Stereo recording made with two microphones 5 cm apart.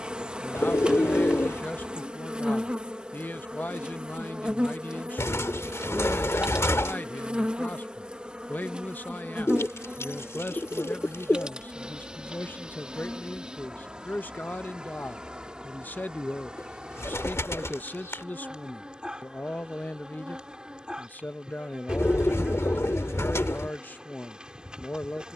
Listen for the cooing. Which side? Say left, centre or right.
left.